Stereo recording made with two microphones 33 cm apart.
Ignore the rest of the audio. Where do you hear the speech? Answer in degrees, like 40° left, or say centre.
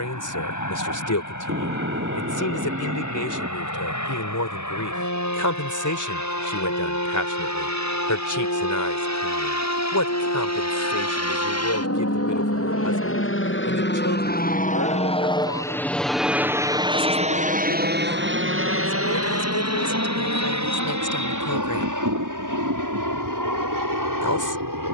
70° left.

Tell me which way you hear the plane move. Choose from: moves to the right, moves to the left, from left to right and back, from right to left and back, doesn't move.
moves to the right.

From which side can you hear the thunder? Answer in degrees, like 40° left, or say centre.
40° right.